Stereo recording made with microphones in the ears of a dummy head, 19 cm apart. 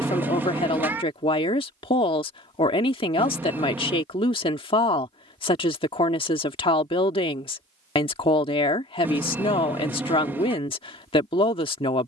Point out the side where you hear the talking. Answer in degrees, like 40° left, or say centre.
30° left.